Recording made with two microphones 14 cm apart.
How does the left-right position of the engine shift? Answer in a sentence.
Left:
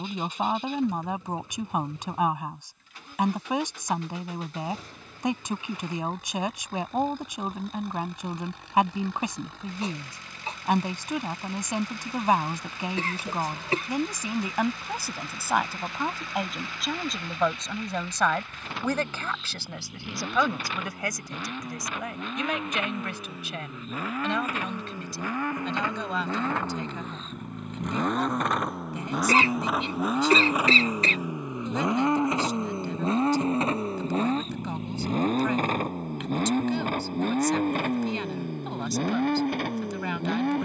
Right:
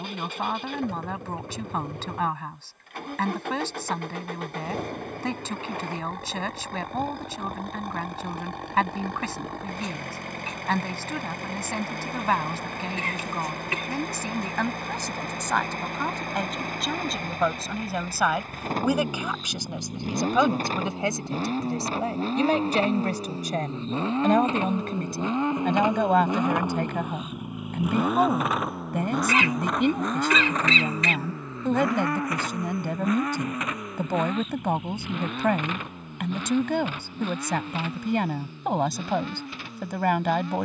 In this clip you hear the engine go from the right side to the left.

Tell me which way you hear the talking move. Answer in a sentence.
In this clip you hear the talking go from the left side to the right.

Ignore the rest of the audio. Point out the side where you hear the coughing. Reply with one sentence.
You can hear the coughing on the left.